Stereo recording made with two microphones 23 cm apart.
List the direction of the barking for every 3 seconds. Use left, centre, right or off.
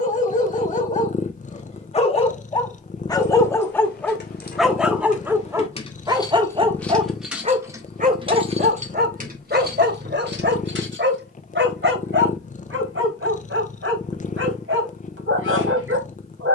left, centre, right, right, right, right.